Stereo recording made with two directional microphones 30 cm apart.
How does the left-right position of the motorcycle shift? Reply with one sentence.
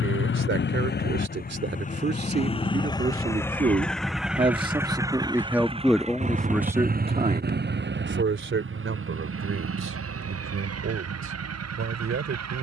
You can hear the motorcycle go from the left side to the right.